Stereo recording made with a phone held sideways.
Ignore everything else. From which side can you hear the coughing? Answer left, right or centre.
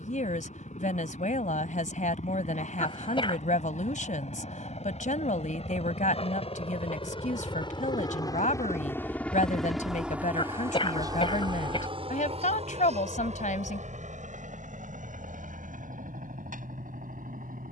left.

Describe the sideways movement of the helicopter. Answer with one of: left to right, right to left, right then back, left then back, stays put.
left to right.